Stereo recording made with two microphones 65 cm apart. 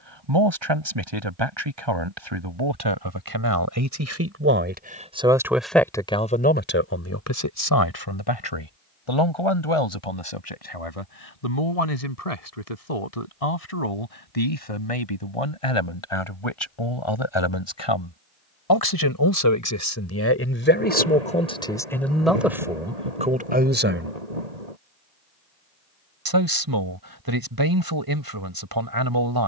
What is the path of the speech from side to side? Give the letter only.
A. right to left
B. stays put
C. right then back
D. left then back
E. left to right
D.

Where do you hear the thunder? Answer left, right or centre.
right.